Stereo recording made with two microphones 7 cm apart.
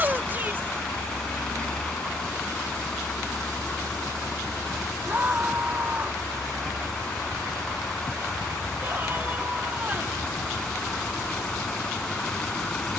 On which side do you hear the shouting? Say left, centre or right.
right.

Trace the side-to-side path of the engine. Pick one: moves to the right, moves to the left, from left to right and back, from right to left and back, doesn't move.
doesn't move.